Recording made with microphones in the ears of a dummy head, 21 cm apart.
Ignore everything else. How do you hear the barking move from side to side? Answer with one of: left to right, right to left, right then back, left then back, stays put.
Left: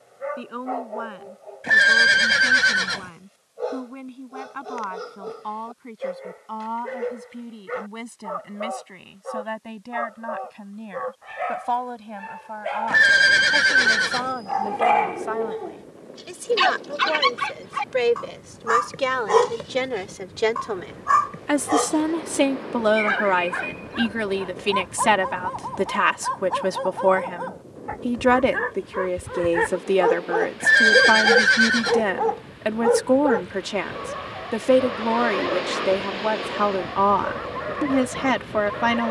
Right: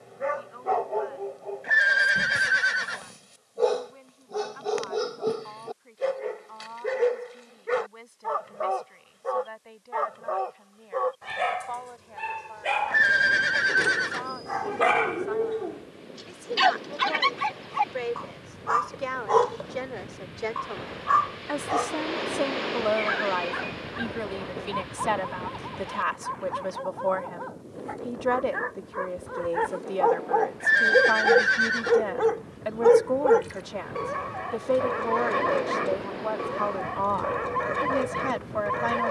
left then back.